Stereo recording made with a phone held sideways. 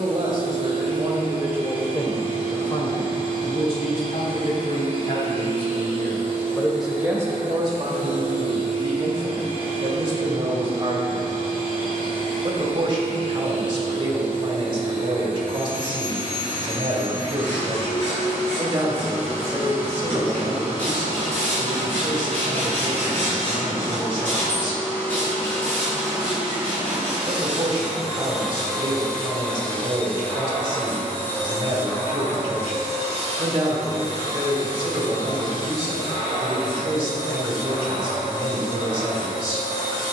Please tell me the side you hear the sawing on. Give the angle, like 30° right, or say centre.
10° left.